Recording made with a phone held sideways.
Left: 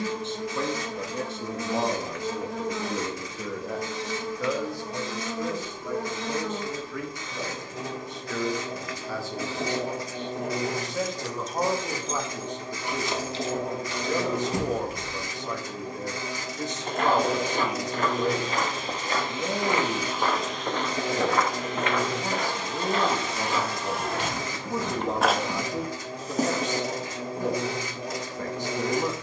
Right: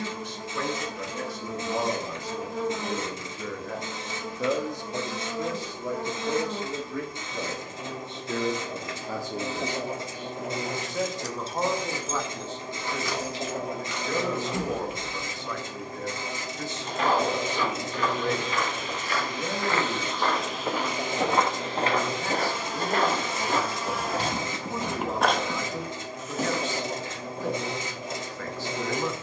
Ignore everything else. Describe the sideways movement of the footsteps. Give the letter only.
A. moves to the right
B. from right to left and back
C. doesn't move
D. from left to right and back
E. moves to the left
D.